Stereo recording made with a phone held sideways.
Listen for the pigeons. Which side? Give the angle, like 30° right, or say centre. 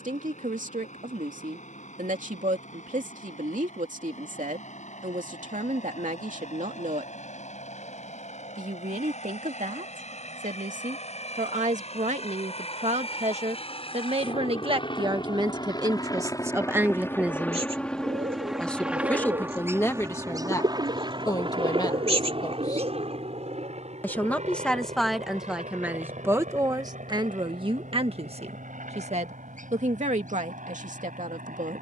50° right.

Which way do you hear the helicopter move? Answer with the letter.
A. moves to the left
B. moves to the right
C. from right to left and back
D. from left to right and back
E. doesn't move
B.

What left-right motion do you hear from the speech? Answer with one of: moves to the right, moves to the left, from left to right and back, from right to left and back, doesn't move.
from right to left and back.